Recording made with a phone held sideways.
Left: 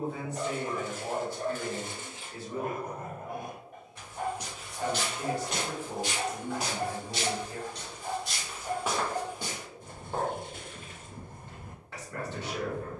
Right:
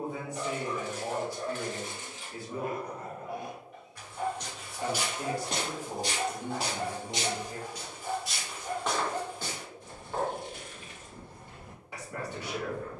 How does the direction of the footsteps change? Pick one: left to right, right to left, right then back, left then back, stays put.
right then back.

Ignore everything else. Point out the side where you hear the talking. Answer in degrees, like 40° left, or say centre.
10° right.